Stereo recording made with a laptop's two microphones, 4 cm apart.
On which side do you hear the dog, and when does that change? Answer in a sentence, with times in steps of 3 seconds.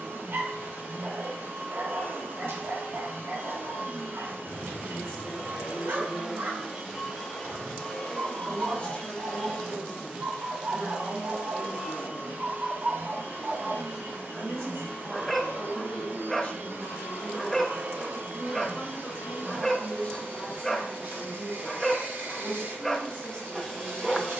You can hear the dog on the right from 0 s and in the centre from 15 s.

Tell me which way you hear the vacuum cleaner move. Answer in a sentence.
In this clip you hear the vacuum cleaner go left and come back.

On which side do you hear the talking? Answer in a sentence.
You can hear the talking on the left.